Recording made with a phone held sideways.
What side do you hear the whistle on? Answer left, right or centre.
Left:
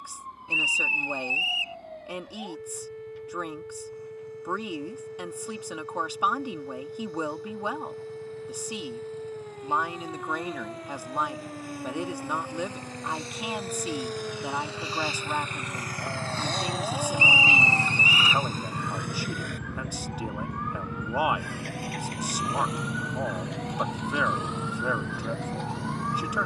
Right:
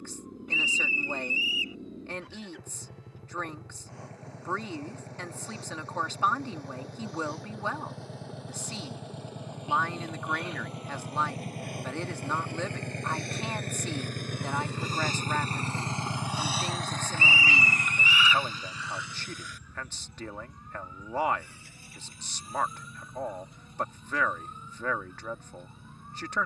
left.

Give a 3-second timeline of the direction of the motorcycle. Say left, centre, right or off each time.
right, right, right, right, right, centre, left, left, left.